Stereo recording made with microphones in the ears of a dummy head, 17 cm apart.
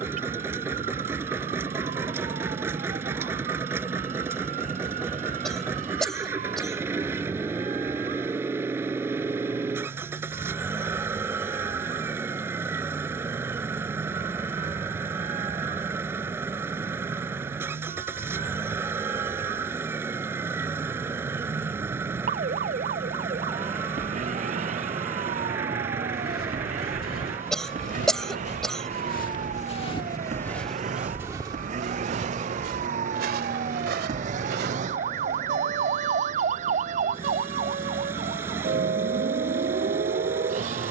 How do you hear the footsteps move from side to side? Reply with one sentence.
You can hear the footsteps travel towards the right.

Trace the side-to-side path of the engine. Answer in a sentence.
You can hear the engine stay in one place.